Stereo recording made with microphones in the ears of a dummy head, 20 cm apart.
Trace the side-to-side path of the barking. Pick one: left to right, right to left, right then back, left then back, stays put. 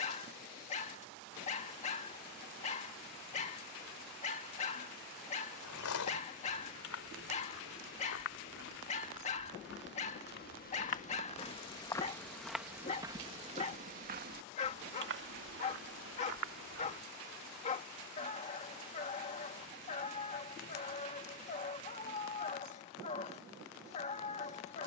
stays put.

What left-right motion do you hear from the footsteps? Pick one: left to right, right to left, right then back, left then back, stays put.
left to right.